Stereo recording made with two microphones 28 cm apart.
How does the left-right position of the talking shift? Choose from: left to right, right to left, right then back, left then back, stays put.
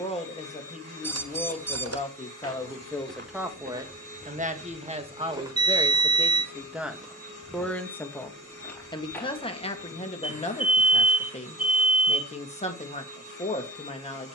right then back.